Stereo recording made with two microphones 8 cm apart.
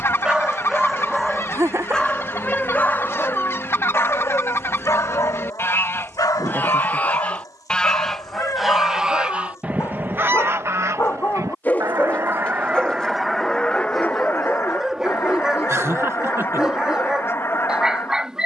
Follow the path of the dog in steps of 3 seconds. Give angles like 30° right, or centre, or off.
centre, 40° left, 50° left, 30° left, 10° left, 10° right.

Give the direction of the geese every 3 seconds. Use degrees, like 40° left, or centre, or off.
30° left, 30° left, 10° left, 30° right, centre, 30° left.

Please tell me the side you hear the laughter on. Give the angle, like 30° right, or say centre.
40° right.